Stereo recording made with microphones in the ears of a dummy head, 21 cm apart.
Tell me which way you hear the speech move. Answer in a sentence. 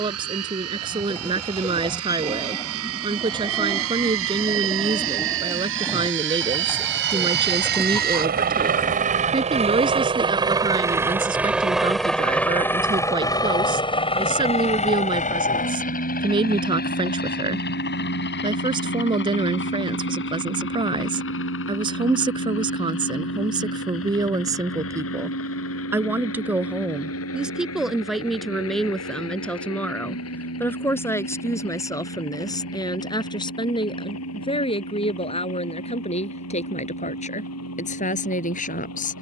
In this clip you hear the speech move from right to left.